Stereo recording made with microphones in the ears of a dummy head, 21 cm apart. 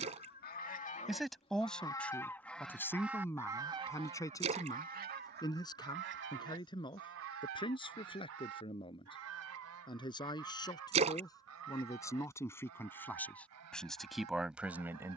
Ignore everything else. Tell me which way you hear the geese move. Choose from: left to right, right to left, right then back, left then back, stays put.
left to right.